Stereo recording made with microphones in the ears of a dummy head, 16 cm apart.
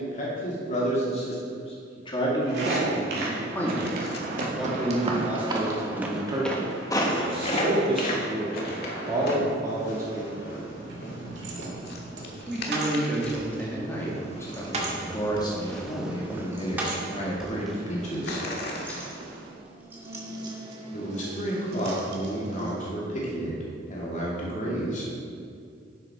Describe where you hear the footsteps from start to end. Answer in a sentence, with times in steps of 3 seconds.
In this clip you hear the footsteps on the right from 0 s, on the left from 6 s, in the centre from 15 s, on the right from 18 s and not at all from 21 s.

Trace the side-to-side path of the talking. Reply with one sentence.
In this clip you hear the talking move from left to right and back again.